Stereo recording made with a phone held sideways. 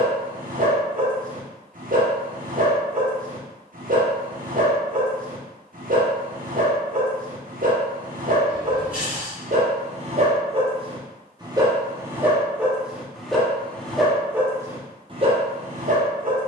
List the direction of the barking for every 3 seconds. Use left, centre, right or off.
right, right, right, right, centre, right.